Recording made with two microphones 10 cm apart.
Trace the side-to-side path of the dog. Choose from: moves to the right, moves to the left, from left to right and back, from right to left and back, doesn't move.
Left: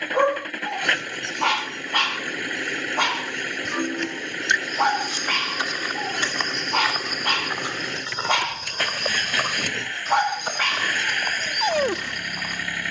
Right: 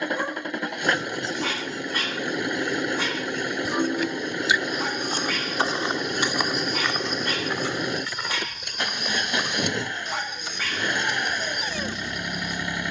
doesn't move.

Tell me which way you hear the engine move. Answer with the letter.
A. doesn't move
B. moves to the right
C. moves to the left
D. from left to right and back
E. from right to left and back
A.